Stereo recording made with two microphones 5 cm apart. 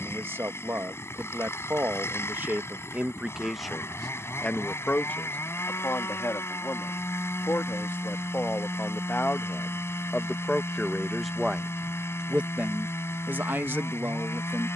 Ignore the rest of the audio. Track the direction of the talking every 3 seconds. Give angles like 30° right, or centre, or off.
40° right, 20° left, 50° left, 20° left, 40° right.